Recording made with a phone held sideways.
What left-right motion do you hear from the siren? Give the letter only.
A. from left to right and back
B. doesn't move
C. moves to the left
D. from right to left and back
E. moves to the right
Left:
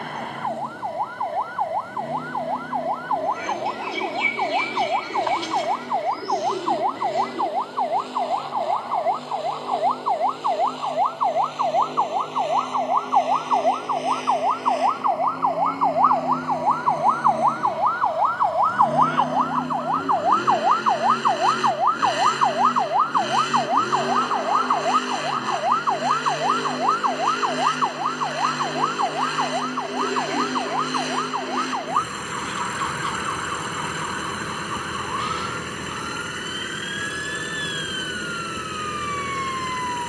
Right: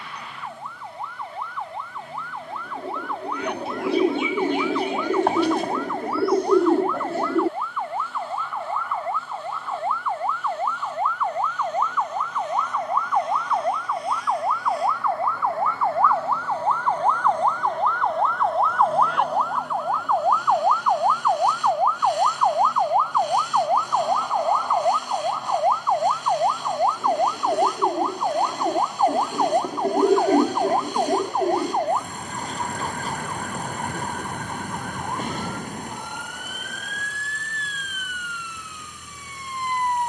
E.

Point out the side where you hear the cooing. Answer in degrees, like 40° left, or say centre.
50° right.